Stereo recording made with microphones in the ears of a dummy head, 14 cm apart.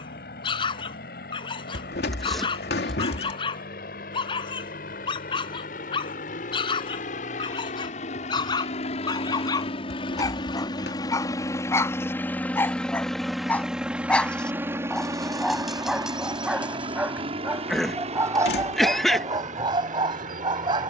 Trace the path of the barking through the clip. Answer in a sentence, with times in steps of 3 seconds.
You can hear the barking on the left from 0 s, in the centre from 12 s and on the right from 18 s.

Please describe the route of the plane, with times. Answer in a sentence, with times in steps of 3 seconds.
In this clip you hear the plane on the left from 0 s, in the centre from 12 s and on the right from 15 s.